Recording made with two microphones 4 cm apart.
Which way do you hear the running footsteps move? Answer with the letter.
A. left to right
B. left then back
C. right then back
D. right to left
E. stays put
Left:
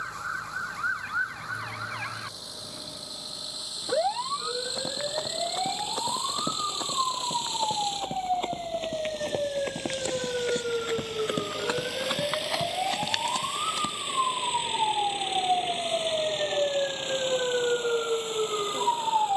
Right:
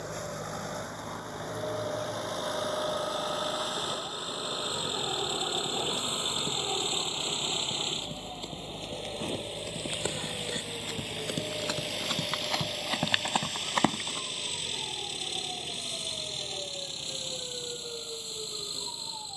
A.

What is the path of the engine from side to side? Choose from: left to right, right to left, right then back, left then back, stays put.
right to left.